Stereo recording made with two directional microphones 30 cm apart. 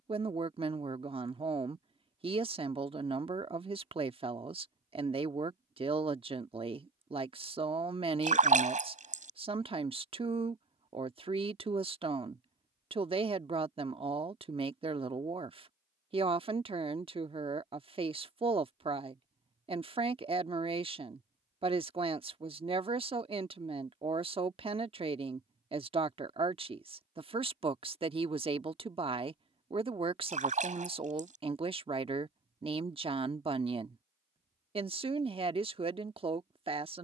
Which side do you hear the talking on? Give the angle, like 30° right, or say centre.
20° right.